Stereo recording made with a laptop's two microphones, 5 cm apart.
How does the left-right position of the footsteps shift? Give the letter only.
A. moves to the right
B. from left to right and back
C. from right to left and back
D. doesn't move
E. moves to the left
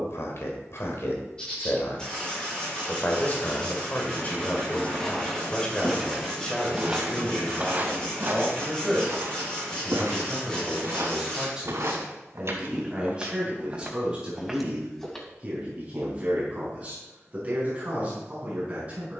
B.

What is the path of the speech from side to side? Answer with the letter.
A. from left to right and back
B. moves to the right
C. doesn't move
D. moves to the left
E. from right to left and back
B.